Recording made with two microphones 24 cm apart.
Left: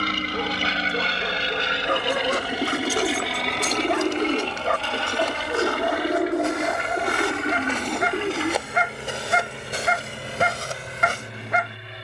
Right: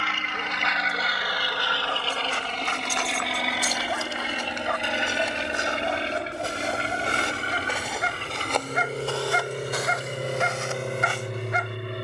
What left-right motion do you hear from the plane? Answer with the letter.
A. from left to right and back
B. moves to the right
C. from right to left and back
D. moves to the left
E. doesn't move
B.